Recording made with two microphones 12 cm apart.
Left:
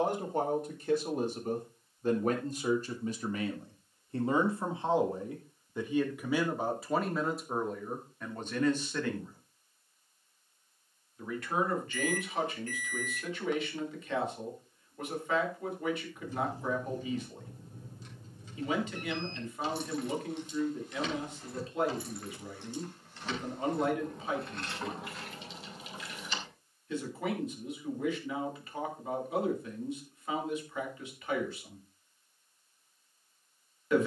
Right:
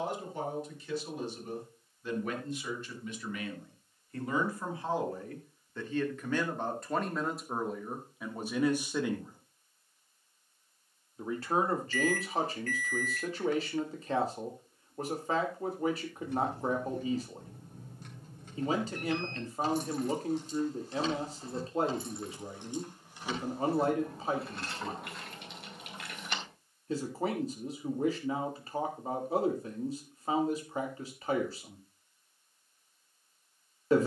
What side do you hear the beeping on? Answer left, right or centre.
left.